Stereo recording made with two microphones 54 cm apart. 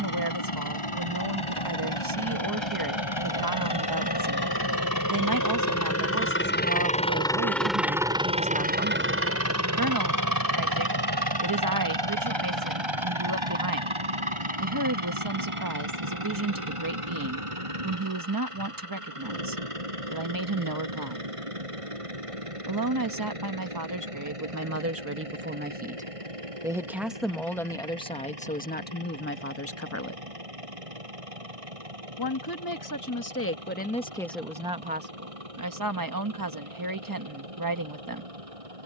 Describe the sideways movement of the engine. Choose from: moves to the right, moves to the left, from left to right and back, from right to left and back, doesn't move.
moves to the right.